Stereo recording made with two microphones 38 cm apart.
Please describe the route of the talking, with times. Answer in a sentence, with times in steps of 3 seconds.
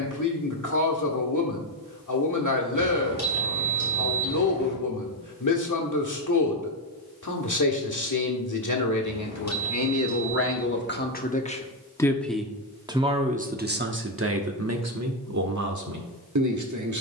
You can hear the talking on the left from 0 s and on the right from 12 s.